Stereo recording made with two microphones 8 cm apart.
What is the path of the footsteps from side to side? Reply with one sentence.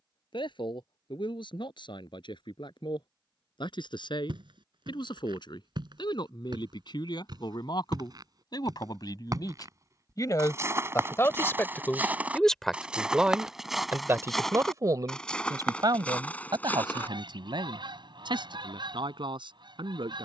In this clip you hear the footsteps go from the right side to the left.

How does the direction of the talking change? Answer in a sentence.
You can hear the talking travel towards the right.